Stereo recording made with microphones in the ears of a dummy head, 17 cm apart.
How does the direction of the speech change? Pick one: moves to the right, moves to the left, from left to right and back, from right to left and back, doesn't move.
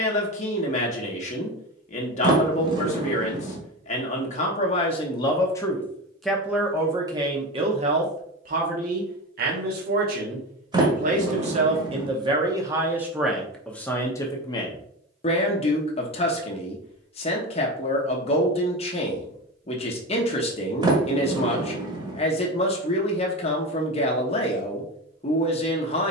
from left to right and back.